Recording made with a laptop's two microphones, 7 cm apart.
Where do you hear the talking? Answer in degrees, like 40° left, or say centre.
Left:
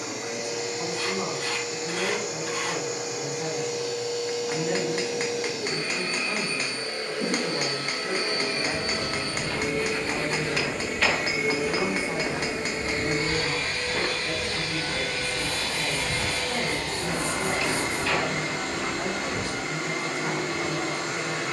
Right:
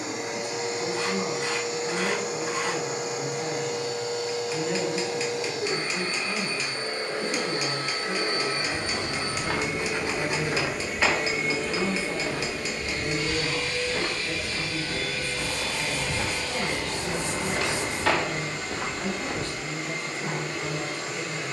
20° left.